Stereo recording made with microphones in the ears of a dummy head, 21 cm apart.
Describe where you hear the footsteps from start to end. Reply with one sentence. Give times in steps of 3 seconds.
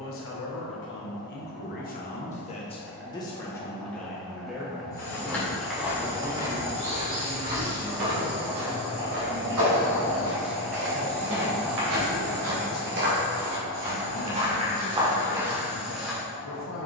In this clip you hear the footsteps not at all from 0 s, in the centre from 3 s, on the right from 6 s and in the centre from 15 s.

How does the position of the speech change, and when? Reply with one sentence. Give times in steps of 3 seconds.
You can hear the speech on the left from 0 s, in the centre from 3 s, on the right from 6 s, in the centre from 9 s and on the left from 12 s.